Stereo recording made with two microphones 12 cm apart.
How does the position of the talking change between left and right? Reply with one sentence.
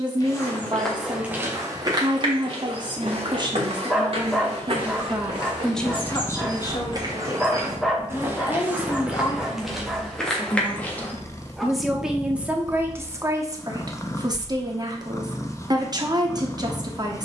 You can hear the talking move from right to left and back again.